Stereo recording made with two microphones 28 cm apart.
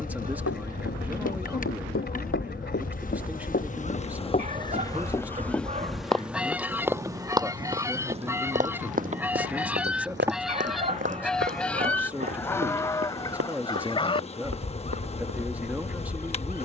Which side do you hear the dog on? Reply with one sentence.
You can hear the dog on the right.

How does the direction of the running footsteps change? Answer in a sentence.
In this clip you hear the running footsteps go from the left side to the right.